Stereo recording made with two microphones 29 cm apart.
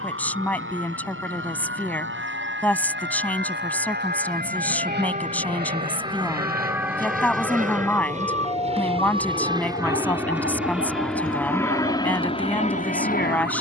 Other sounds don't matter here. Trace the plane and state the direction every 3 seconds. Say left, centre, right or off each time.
right, right, right, centre, left.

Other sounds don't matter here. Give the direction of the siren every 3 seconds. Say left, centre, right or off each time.
right, right, centre, left, left.